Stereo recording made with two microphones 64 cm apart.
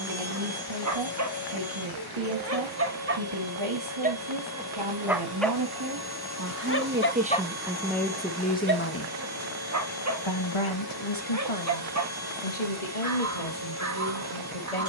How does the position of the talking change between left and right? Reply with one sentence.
In this clip you hear the talking travel towards the left.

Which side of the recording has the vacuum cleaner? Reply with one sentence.
In this clip you hear the vacuum cleaner on the right.